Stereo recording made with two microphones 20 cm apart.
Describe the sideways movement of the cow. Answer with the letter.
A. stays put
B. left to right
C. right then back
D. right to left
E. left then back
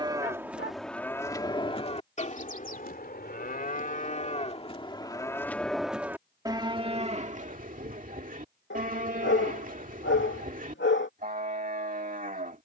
E.